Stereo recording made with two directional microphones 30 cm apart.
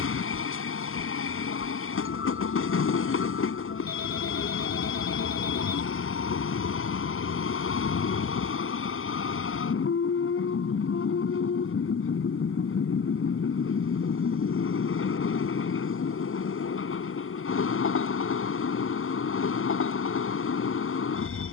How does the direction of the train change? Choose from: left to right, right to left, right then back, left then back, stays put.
stays put.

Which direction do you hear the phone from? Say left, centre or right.
left.